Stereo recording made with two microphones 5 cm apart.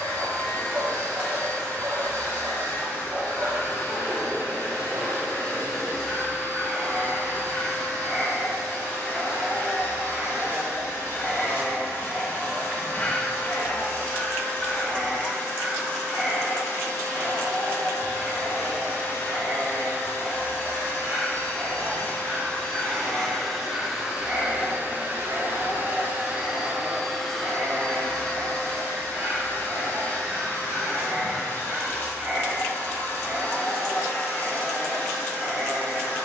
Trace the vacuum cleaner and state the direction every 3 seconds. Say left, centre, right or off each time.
left, left, left, left, left, left, left, left, right, left, left, left.